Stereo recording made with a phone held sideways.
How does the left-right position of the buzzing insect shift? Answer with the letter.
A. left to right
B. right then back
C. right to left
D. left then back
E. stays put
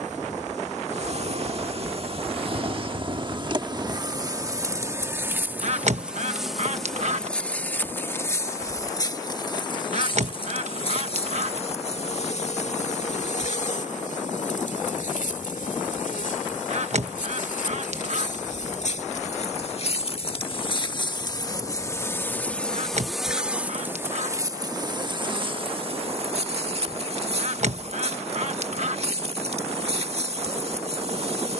D.